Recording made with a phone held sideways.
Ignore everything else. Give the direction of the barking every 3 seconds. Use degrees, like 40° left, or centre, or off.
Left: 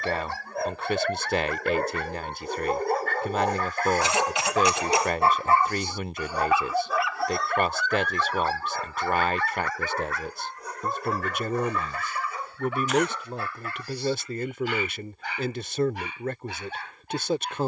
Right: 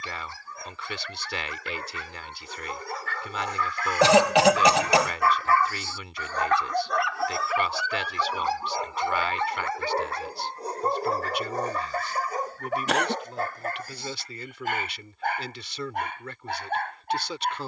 60° left, 40° left, centre, 30° right, 50° right, 50° right.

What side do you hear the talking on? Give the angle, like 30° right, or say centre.
50° left.